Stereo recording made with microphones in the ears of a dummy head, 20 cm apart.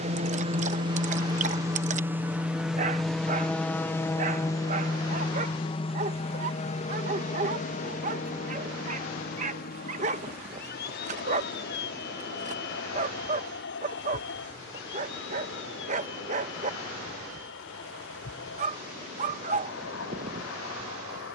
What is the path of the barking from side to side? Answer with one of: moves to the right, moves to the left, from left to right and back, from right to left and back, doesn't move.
doesn't move.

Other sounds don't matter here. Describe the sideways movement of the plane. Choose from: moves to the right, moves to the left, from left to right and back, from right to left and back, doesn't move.
moves to the left.